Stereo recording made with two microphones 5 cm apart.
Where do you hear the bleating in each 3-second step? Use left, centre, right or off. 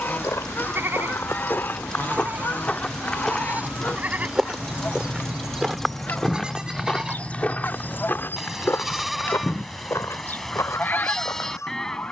right, right, centre, centre.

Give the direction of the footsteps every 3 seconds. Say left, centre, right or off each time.
left, centre, left, left.